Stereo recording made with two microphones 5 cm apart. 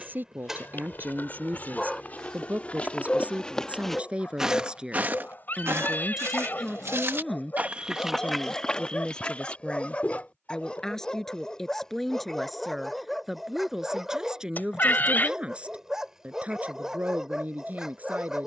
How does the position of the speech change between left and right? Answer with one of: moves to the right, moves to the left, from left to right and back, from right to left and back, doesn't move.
from right to left and back.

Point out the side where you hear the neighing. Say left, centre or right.
left.